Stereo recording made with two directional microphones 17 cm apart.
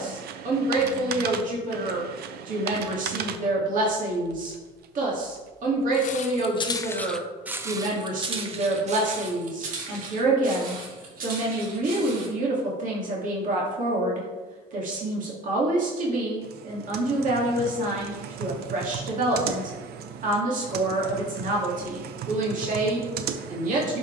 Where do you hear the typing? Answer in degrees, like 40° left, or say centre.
70° right.